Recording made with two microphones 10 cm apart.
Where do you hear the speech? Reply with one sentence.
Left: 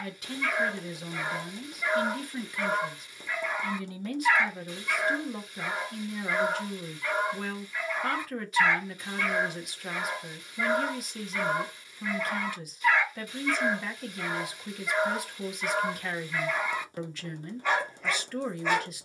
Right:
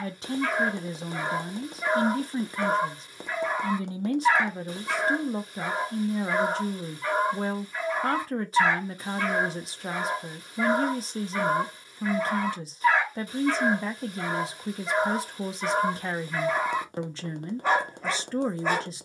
In this clip you hear the speech on the right.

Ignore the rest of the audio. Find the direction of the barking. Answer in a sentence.
In this clip you hear the barking on the right.